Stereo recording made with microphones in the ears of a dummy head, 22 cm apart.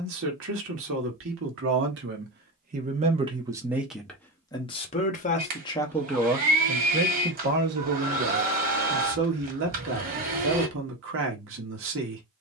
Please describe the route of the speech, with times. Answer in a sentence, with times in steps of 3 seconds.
In this clip you hear the speech on the right from 0 s, in the centre from 3 s and on the right from 6 s.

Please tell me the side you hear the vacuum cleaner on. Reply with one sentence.
You can hear the vacuum cleaner on the right.